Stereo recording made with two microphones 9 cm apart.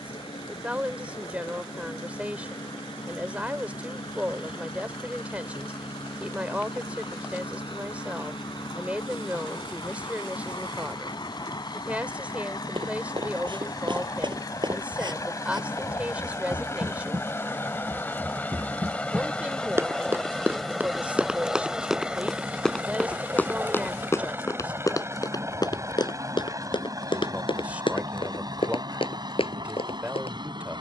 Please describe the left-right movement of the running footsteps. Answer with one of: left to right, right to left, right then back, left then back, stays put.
right to left.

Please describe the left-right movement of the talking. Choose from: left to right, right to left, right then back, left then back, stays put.
stays put.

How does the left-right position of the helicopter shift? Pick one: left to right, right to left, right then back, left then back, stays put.
left to right.